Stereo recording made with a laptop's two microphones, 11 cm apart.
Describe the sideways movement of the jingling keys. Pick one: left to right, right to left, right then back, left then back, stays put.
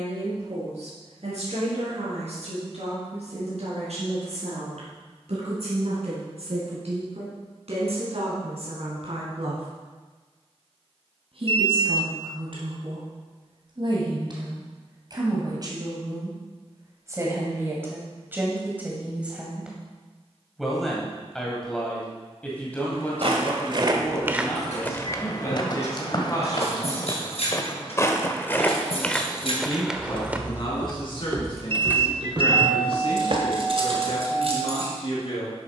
left to right.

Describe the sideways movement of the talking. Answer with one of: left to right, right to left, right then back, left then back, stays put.
right to left.